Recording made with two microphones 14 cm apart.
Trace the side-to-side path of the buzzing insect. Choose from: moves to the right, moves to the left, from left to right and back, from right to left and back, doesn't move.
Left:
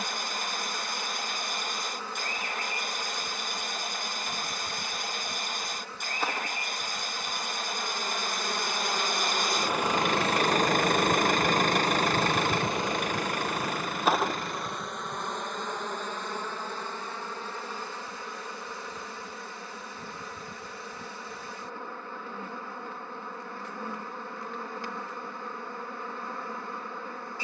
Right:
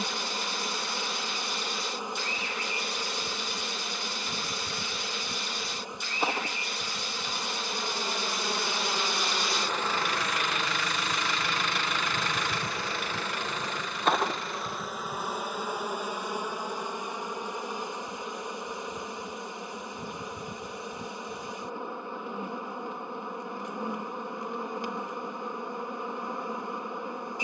from right to left and back.